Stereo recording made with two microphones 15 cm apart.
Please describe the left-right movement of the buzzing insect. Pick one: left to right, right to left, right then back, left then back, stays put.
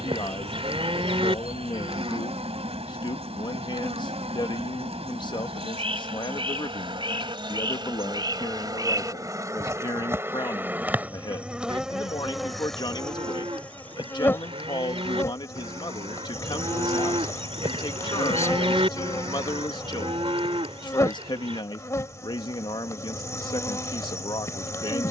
right to left.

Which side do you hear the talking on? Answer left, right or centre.
left.